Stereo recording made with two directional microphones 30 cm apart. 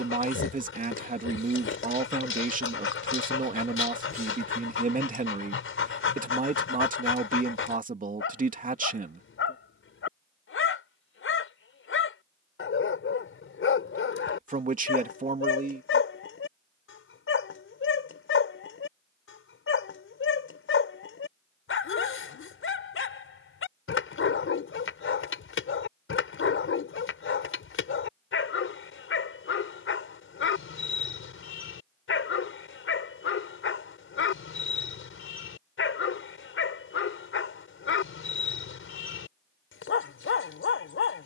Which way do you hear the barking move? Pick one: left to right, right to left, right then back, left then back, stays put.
stays put.